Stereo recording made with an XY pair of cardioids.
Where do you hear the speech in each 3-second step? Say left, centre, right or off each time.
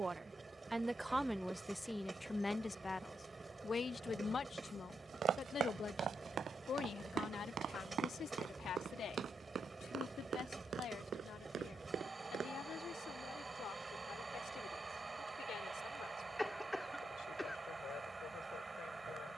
centre, left, left, left, left, left, left.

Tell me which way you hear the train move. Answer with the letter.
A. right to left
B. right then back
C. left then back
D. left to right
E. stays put
E.